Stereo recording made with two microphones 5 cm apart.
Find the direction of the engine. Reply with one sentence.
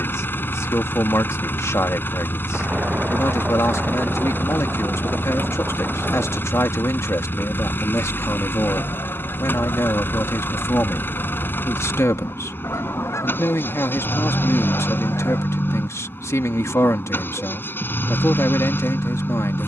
In this clip you hear the engine on the left.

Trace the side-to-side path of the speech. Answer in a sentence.
In this clip you hear the speech stay put.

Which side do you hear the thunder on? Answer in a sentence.
You can hear the thunder on the right.